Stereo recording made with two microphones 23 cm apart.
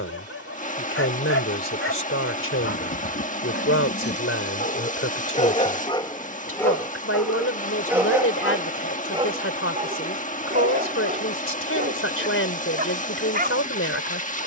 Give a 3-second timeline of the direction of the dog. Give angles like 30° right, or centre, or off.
70° left, 40° left, centre, 30° right, 40° right.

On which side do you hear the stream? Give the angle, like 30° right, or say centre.
30° left.